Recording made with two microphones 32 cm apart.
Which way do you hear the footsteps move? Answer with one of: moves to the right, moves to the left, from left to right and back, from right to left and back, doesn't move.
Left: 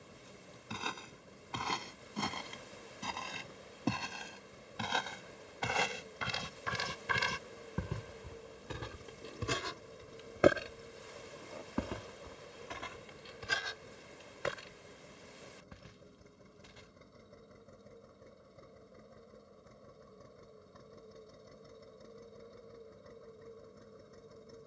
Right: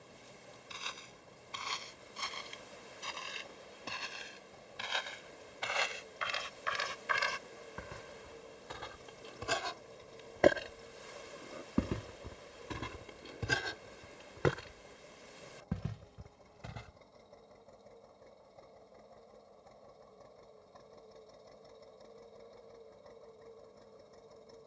moves to the right.